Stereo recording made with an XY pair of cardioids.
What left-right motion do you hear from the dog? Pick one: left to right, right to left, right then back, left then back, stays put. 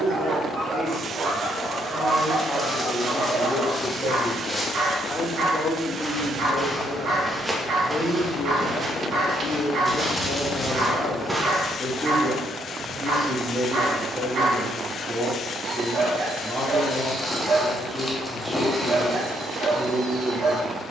stays put.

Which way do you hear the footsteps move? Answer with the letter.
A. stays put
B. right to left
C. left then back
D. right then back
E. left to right
D.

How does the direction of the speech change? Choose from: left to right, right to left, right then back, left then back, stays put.
left then back.